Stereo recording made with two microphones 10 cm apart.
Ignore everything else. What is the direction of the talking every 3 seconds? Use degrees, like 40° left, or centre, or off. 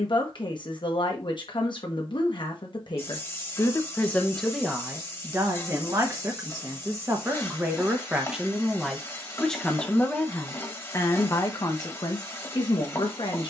50° left, centre, 20° right, 20° left, 50° left.